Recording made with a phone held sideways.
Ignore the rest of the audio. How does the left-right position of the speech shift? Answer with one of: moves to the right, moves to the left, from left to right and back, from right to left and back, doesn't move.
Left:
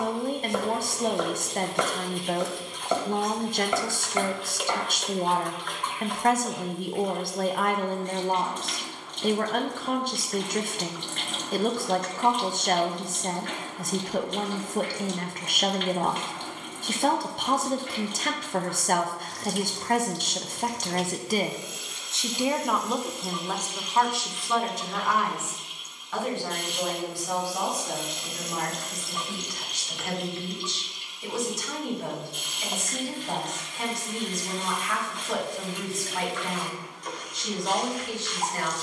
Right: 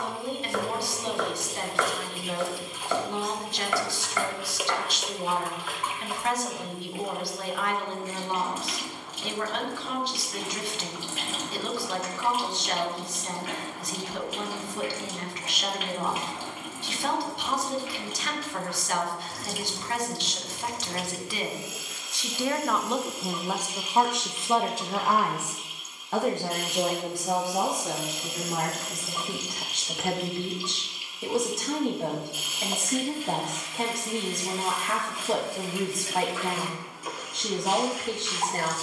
moves to the right.